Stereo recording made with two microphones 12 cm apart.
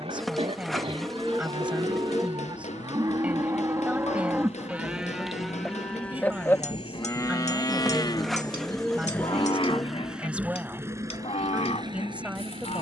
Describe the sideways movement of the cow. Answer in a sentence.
You can hear the cow go from the right side to the left.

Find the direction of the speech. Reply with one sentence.
In this clip you hear the speech in the centre.